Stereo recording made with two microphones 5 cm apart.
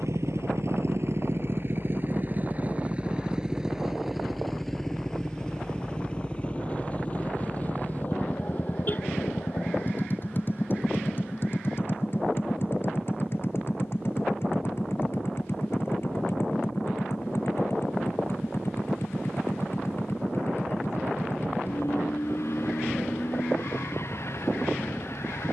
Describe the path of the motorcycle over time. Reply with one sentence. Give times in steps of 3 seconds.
In this clip you hear the motorcycle on the right from 0 s, in the centre from 3 s and on the left from 6 s.